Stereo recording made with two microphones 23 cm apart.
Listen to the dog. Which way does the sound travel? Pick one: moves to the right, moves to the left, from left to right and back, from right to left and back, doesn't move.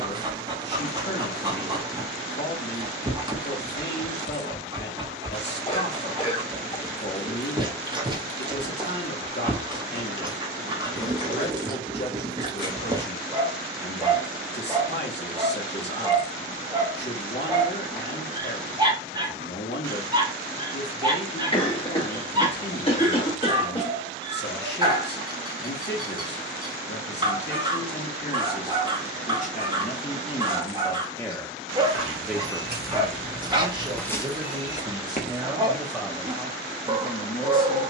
doesn't move.